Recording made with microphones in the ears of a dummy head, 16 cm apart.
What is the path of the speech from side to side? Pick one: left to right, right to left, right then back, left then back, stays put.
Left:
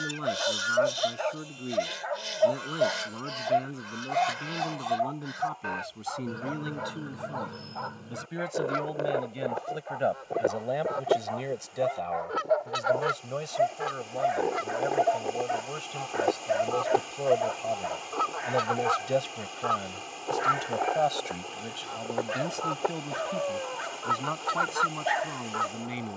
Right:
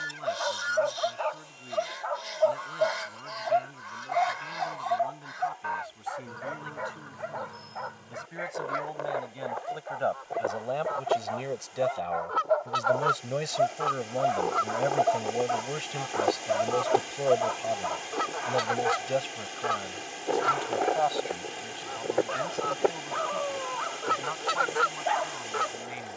right then back.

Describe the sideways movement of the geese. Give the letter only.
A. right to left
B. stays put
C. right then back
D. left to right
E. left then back
D.